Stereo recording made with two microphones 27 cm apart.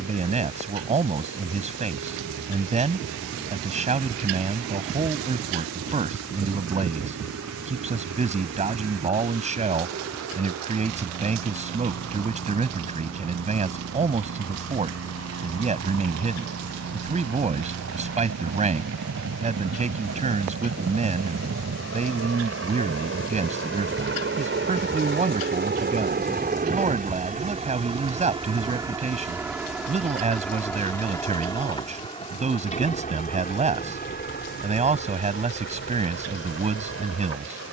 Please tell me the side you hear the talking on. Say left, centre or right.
right.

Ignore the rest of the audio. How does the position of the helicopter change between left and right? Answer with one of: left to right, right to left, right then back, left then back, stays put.
right to left.